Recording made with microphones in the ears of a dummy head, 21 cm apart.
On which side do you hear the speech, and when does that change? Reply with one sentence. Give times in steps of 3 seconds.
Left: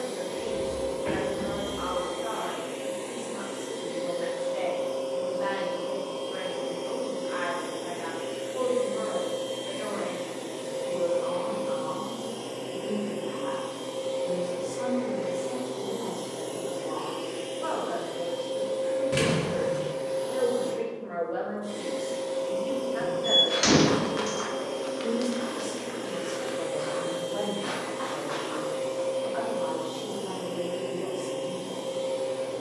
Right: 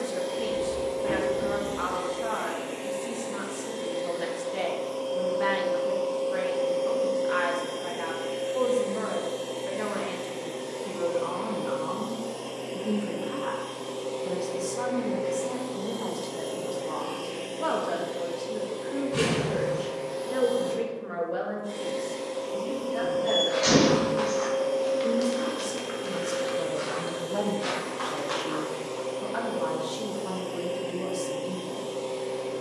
You can hear the speech on the right from 0 s, in the centre from 21 s and on the right from 27 s.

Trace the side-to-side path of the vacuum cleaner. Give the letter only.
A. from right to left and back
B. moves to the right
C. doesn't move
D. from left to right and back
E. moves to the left
C.